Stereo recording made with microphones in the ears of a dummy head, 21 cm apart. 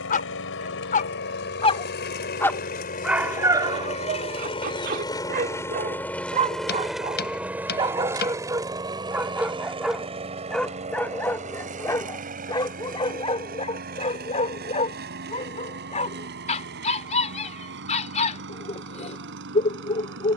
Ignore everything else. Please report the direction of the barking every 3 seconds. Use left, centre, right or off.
left, right, right, centre, left, left, left.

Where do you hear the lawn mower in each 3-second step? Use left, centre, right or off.
left, left, centre, right, right, right, right.